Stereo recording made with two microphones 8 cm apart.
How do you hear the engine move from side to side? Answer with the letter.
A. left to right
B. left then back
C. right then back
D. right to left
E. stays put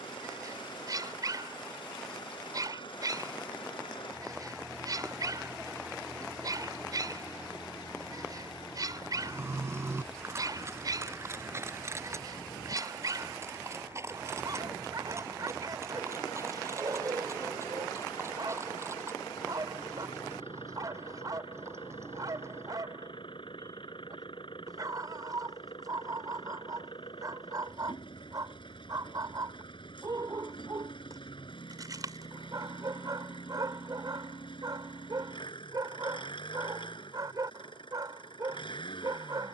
E.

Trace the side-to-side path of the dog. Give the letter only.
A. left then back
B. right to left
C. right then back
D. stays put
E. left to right
D.